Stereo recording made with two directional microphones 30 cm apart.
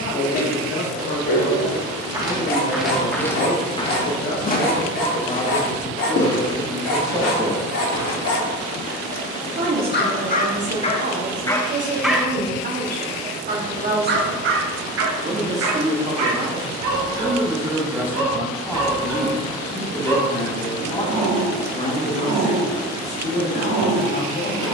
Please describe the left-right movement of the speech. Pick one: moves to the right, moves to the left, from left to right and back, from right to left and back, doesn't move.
from left to right and back.